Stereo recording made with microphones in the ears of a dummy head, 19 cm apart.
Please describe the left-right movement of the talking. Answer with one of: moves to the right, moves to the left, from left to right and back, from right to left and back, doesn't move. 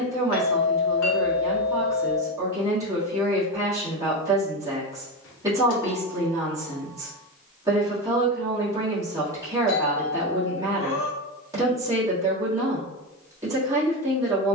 doesn't move.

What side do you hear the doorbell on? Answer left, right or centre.
left.